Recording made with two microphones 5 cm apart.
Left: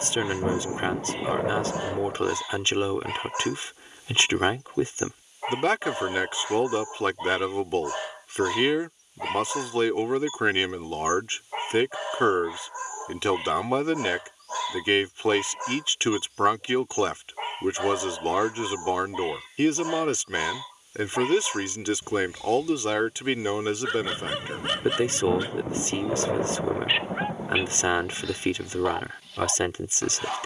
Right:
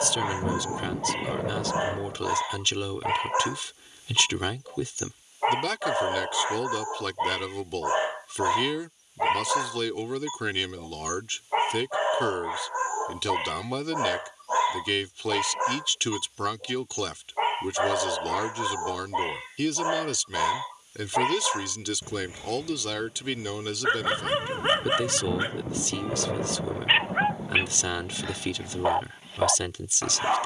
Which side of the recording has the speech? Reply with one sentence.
In this clip you hear the speech on the left.